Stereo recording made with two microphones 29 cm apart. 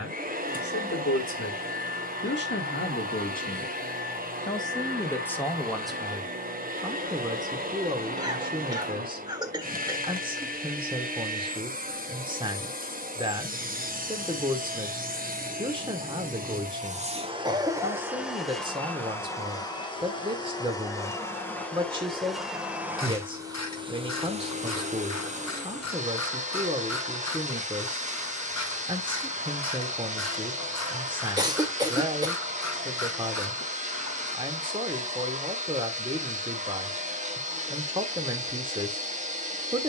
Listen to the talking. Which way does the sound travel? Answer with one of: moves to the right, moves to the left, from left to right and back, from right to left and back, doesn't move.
moves to the right.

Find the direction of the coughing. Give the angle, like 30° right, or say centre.
10° right.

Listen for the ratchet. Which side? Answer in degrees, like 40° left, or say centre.
70° left.